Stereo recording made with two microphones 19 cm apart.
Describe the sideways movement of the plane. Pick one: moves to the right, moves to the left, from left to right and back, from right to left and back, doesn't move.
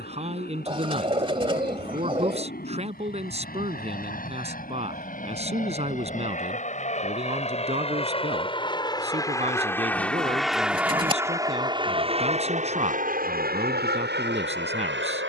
moves to the right.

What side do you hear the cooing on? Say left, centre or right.
right.